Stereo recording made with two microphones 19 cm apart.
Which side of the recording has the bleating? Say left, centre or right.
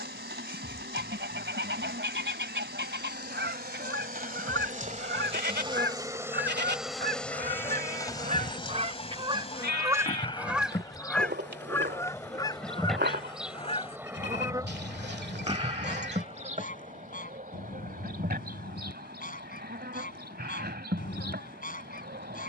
right.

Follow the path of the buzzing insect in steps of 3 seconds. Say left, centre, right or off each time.
right, right, centre, left, centre, right, right, right.